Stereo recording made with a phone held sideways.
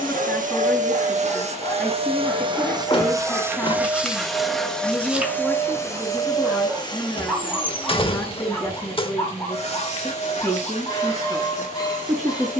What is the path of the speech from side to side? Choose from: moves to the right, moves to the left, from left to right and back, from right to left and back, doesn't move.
doesn't move.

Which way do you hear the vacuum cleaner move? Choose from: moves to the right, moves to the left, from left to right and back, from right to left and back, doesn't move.
moves to the left.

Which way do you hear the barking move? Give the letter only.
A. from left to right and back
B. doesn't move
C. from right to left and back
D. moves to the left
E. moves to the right
A.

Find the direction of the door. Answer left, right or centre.
left.